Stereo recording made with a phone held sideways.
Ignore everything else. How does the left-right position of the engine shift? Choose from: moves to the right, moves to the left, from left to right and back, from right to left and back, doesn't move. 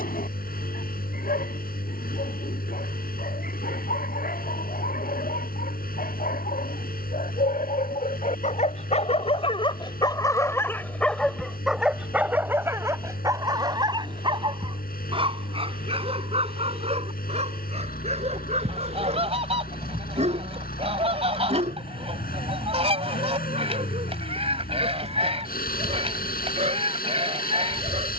doesn't move.